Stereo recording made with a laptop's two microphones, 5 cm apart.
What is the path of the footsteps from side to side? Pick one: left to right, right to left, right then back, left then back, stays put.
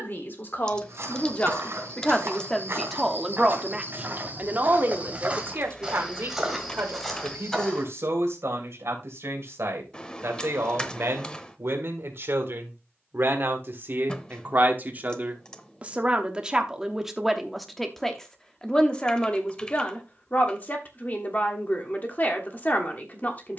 right to left.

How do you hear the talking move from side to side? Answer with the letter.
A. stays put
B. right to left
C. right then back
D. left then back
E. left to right
C.